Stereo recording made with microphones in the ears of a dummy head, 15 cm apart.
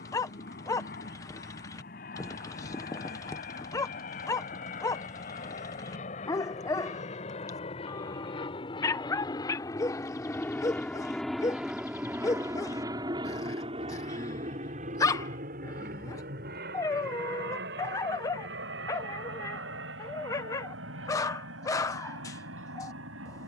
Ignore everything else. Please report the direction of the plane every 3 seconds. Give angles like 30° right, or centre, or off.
60° left, 50° left, 40° left, 10° left, 30° right, 60° right, 70° right, 80° right.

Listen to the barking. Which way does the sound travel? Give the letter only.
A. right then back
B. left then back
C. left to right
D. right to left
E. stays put
E.